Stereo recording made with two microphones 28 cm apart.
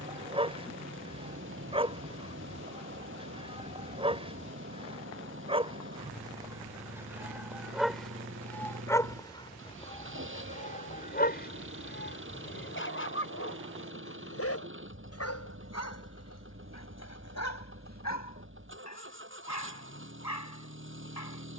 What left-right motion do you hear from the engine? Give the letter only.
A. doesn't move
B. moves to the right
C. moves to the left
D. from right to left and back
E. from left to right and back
A.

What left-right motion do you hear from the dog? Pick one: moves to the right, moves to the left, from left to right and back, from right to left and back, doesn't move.
moves to the left.